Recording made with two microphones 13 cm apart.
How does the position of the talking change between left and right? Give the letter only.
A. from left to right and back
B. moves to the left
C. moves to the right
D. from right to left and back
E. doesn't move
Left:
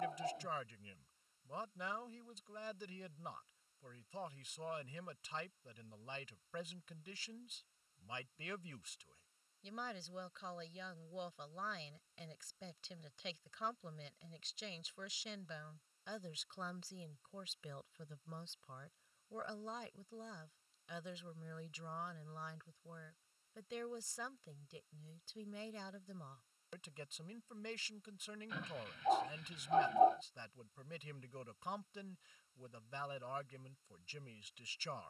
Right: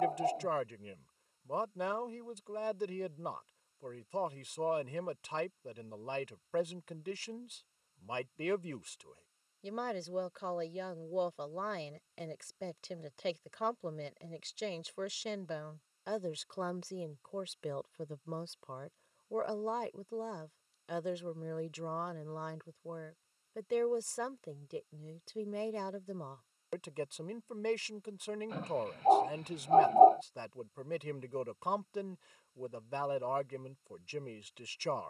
E.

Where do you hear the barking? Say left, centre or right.
right.